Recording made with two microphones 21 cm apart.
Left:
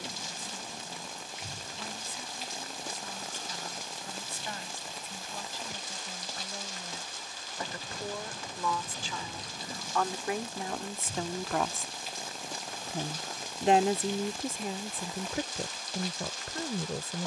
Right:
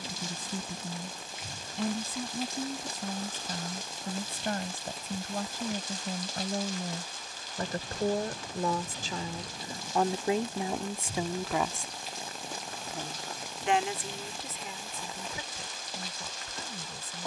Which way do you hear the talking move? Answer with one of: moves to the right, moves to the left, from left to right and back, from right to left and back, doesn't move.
moves to the left.